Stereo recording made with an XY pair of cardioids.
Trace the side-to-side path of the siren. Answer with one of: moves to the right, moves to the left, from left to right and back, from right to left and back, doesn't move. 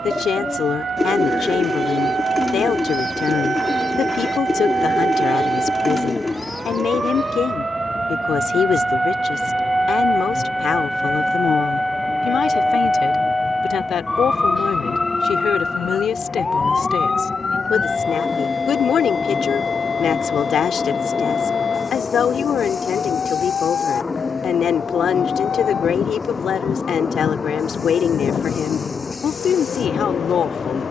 moves to the left.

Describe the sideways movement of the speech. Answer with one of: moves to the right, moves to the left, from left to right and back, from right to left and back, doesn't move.
doesn't move.